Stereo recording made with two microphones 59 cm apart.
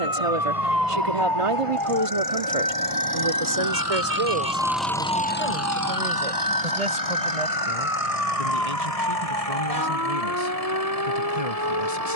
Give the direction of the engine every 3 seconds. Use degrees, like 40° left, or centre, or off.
60° right, 10° right, 60° left, 70° left.